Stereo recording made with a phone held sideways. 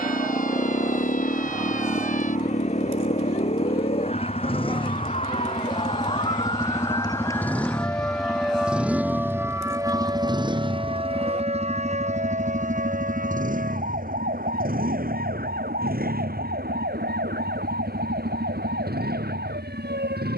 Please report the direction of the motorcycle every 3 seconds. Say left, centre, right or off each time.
left, left, centre, right, right, right, right.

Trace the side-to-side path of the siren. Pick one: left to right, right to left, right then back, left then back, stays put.
left to right.